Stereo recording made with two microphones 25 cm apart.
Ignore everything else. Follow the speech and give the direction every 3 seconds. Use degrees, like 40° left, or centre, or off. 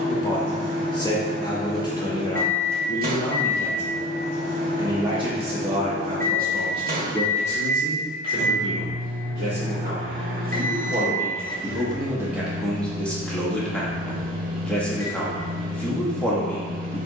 20° left, 10° right, 40° right, 30° right, centre, centre.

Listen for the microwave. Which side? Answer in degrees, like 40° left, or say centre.
40° right.